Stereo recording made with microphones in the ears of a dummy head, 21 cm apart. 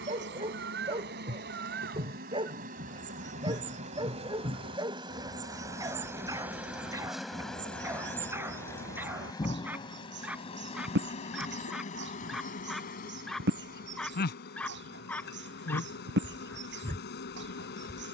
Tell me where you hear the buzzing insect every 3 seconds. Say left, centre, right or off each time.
right, right, centre, left, left, left.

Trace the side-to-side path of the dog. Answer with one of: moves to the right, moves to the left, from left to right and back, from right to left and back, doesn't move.
moves to the left.